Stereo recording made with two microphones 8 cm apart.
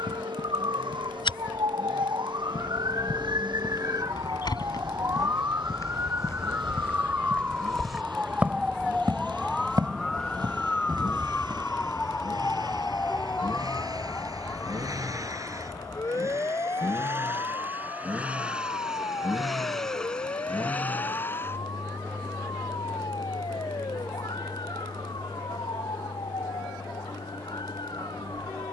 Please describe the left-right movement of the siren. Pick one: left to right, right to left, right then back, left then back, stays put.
right to left.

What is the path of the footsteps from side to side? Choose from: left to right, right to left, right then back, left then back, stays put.
left to right.